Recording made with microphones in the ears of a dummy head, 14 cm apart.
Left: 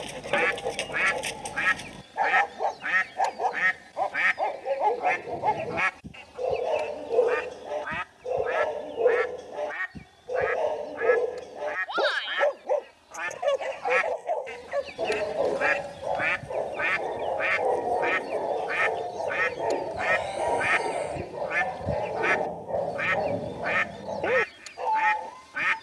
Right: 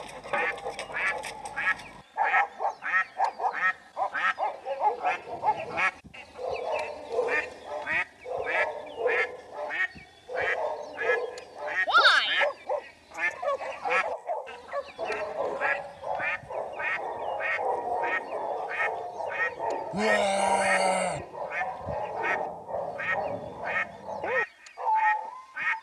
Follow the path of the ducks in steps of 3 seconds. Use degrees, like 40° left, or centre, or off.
50° left, 20° left, 10° right, 30° right, centre, 60° left, 70° left, 70° left, 70° left.